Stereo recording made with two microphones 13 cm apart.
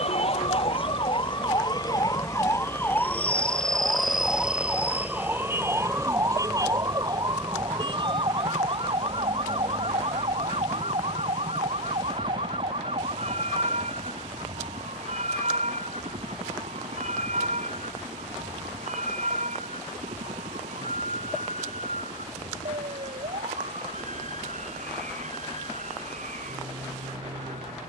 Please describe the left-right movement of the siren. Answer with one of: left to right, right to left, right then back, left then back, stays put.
left to right.